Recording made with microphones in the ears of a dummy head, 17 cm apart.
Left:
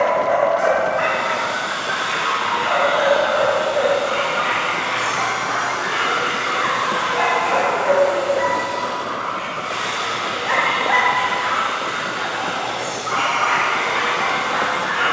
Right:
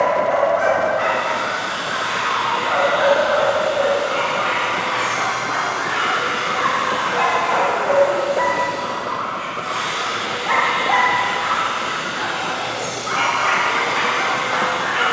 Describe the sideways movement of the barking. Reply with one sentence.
You can hear the barking travel towards the right.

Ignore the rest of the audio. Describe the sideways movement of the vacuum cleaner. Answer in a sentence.
In this clip you hear the vacuum cleaner go from the left side to the right.